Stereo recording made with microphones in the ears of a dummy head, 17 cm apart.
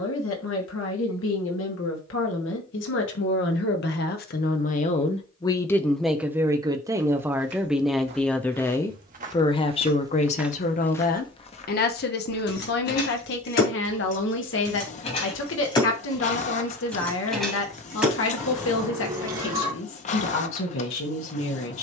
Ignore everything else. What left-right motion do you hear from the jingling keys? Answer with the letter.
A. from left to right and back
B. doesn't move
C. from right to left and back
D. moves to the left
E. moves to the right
E.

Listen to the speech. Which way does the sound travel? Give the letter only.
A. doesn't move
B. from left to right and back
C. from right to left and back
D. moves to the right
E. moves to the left
B.